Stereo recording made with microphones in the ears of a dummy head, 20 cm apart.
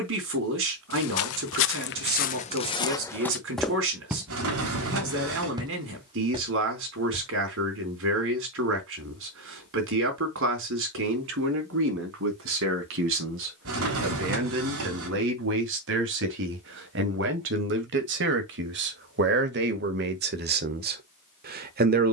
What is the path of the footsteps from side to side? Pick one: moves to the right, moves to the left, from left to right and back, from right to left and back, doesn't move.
moves to the right.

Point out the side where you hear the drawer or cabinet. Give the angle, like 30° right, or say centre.
70° right.